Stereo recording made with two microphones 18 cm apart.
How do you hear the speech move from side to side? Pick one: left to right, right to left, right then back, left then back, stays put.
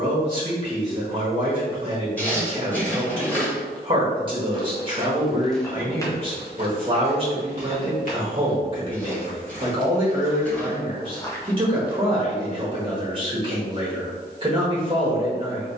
stays put.